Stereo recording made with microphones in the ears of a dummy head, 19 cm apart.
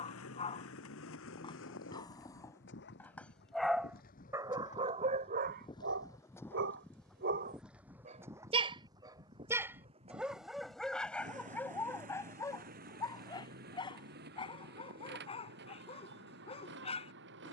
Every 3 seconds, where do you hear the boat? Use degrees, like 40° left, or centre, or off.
60° left, 40° left, centre, 30° right, 40° right, 50° right.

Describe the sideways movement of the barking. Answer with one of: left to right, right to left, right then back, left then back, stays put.
right then back.